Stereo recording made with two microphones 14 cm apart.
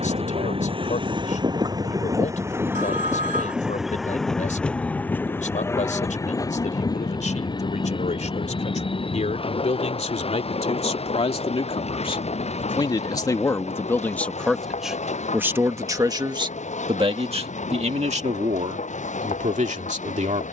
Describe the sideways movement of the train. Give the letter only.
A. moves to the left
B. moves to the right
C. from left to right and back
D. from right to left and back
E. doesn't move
A.